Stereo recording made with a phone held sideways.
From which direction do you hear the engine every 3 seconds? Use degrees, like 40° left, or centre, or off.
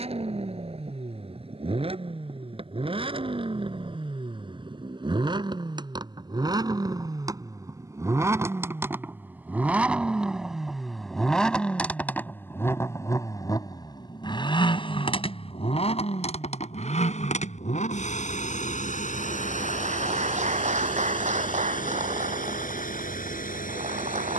40° right, 40° right, 20° right, centre, 30° left, 50° left, 70° left, 80° left.